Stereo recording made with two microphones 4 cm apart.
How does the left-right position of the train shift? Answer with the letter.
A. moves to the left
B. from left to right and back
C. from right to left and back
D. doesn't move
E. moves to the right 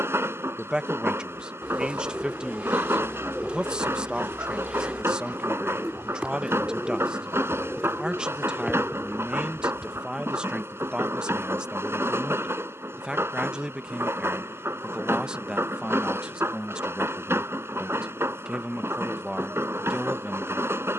D.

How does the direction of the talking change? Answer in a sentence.
In this clip you hear the talking stay in one place.